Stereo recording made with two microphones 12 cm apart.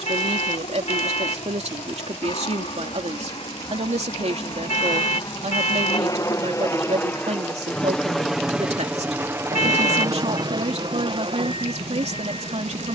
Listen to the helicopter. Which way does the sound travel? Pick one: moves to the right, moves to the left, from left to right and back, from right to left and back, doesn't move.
moves to the right.